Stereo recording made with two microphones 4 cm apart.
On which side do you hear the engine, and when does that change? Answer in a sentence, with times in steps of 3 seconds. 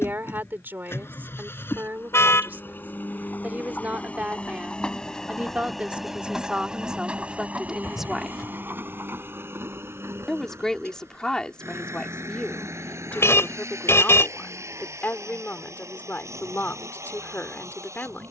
In this clip you hear the engine on the left from 0 s and on the right from 6 s.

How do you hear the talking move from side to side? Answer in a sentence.
In this clip you hear the talking move from right to left.